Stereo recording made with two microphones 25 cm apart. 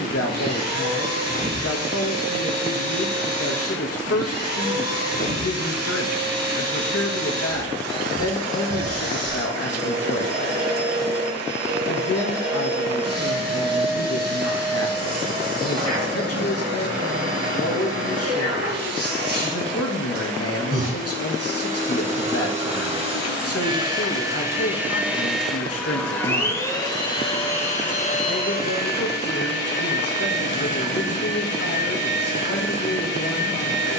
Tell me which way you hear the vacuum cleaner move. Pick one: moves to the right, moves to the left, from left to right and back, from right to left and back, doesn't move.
moves to the left.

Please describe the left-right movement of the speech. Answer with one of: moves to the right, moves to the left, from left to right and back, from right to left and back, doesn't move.
doesn't move.